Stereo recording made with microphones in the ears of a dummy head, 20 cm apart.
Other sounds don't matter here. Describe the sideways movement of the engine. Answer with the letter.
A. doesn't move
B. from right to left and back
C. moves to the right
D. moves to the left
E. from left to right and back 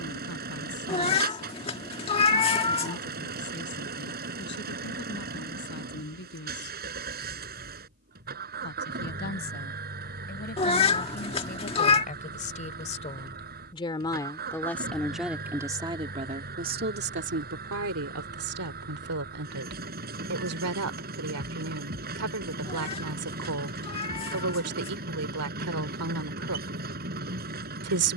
A.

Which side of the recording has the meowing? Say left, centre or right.
left.